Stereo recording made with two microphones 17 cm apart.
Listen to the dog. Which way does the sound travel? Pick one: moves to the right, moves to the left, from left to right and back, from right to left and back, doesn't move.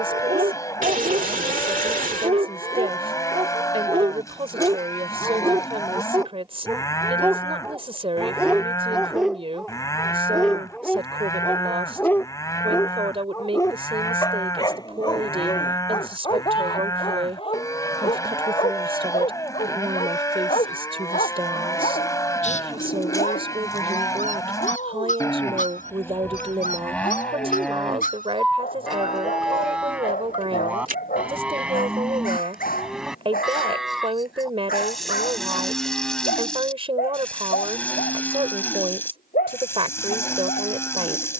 moves to the left.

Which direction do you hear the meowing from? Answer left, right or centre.
right.